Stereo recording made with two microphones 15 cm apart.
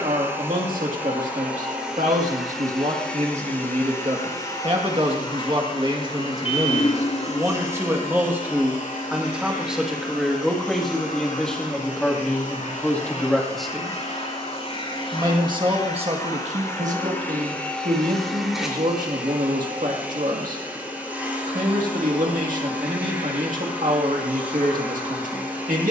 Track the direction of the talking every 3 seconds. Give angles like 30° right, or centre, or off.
60° right, 40° right, 20° right, centre, 10° left, 50° right, 70° right, 70° right, 70° right.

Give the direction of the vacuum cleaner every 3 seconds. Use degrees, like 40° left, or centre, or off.
10° right, 30° left, 60° left, 70° left, 60° left, 20° left, 10° right, 10° right, 10° right.